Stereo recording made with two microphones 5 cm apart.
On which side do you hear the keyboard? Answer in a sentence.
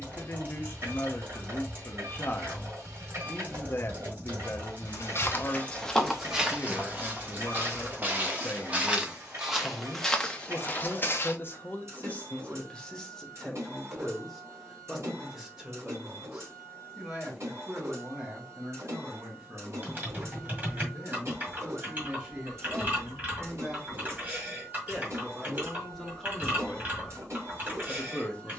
In this clip you hear the keyboard on the right.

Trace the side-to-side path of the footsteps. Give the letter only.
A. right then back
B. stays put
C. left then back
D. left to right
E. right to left
A.